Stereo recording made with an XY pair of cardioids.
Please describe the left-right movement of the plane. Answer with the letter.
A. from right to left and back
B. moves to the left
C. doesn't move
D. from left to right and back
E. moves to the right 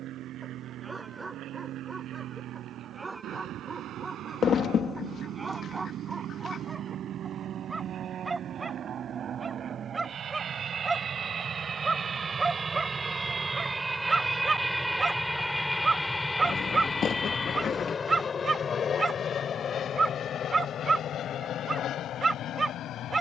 B.